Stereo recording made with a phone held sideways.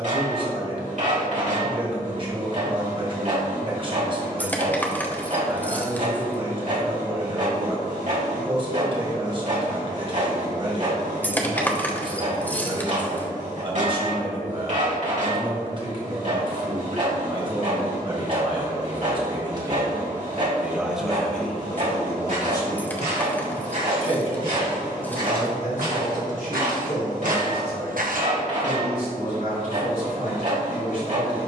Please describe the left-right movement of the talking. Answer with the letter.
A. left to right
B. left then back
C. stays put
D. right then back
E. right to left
E.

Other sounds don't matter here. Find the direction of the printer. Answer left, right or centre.
right.